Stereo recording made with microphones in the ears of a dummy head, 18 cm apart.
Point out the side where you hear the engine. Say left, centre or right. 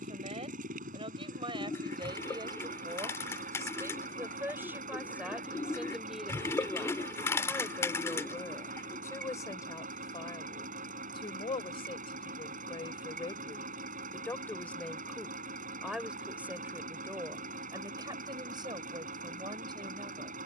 right.